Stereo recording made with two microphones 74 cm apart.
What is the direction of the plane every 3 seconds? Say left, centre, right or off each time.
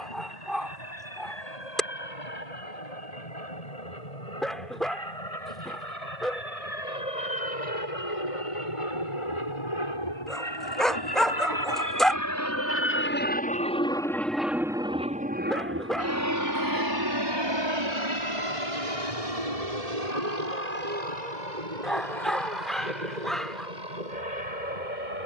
left, left, left, left, centre, right, right, right, right.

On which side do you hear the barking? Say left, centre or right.
centre.